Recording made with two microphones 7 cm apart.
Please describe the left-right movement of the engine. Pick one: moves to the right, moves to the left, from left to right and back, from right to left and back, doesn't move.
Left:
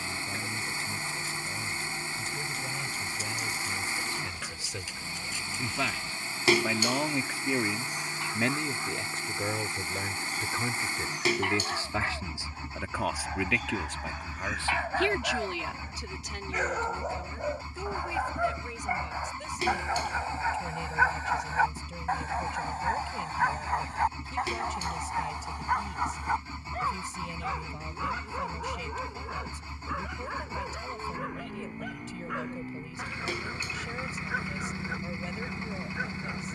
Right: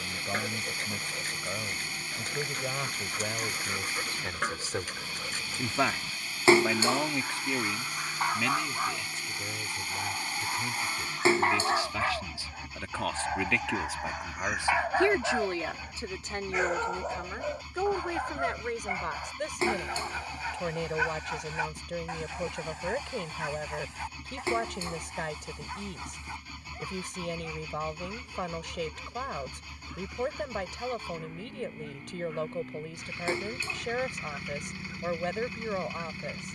doesn't move.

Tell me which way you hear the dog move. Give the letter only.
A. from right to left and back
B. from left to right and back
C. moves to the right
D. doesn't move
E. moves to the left
E.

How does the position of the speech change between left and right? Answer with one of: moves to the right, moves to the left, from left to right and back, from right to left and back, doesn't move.
from right to left and back.